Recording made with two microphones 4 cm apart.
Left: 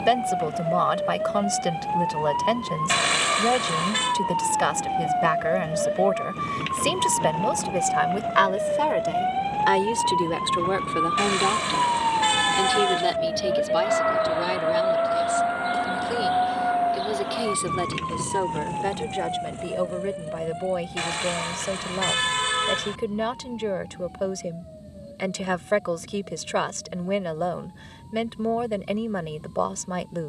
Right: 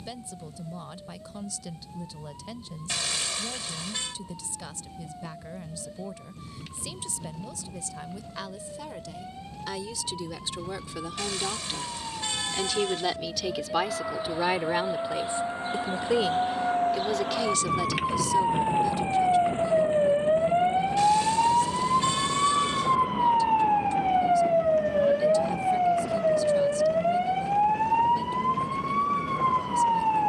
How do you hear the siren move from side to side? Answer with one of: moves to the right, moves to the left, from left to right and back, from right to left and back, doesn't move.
moves to the right.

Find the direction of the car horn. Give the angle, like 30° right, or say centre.
50° left.